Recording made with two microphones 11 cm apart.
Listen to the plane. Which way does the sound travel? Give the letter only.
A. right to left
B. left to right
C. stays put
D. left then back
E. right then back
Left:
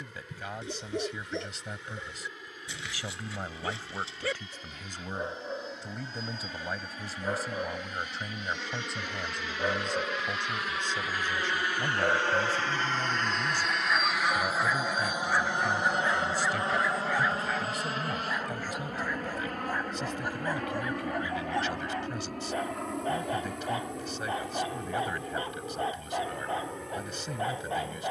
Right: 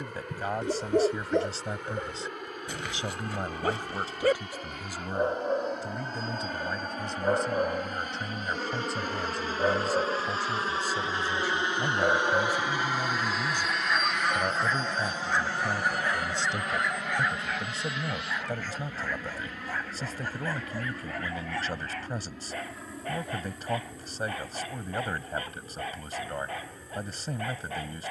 A.